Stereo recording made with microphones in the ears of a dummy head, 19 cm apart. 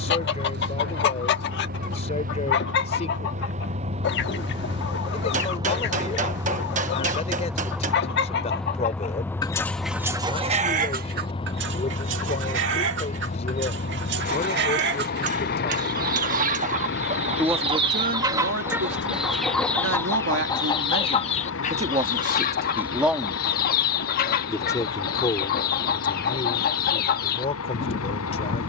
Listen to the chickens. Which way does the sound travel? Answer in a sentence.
In this clip you hear the chickens move from left to right and back again.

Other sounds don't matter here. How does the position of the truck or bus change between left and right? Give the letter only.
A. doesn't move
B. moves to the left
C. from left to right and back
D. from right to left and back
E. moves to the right
B.